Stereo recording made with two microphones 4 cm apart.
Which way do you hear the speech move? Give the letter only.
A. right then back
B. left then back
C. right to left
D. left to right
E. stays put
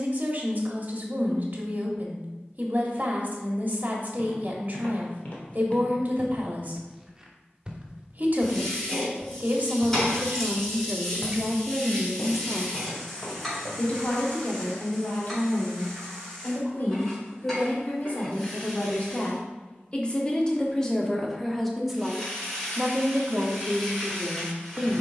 B.